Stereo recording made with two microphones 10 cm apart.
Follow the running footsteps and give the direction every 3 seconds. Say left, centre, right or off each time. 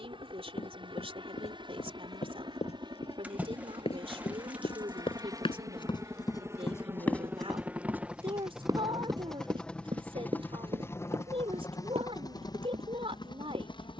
left, left, centre, right, right.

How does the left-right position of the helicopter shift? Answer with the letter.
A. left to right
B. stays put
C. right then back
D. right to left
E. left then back
D.